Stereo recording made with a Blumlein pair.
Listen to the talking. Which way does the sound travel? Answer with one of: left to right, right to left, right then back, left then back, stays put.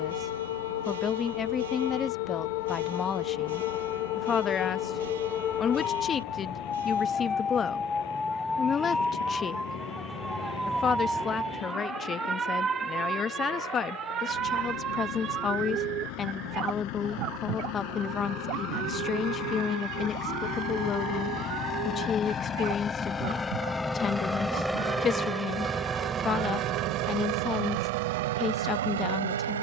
stays put.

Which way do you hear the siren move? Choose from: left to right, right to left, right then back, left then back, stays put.
left to right.